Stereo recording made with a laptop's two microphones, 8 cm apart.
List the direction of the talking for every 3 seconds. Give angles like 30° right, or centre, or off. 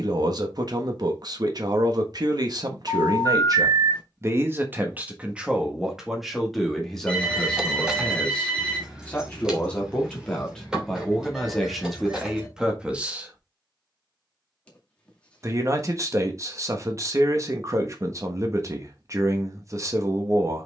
50° right, 30° right, 10° left, 10° left, 10° right, 40° right, 40° right.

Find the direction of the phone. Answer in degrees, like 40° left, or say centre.
10° left.